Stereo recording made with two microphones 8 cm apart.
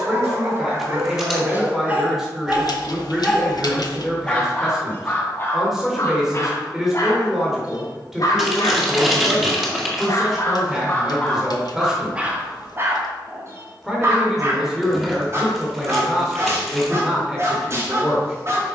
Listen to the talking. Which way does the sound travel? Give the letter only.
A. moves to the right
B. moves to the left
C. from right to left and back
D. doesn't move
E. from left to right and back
D.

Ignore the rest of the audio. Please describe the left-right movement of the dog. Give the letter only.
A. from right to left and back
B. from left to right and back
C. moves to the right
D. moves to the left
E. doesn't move
A.